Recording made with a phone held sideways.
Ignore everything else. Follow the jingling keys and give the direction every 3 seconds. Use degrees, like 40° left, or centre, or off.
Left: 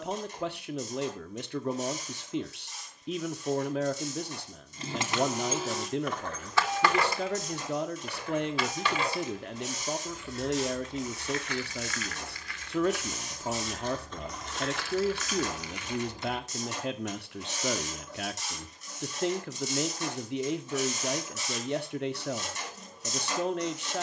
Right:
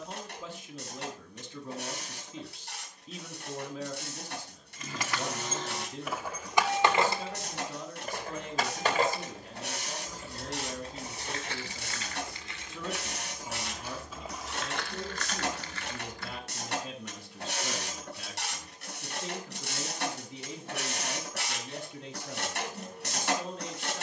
off, 20° left, 30° right, 40° right, 10° right, 10° left, off, off.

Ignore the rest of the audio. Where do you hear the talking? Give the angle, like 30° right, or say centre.
70° left.